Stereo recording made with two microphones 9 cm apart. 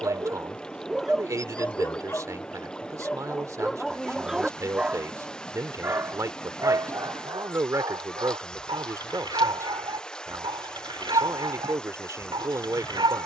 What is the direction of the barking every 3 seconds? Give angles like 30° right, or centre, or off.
centre, 10° right, 50° right, 50° right, 50° right.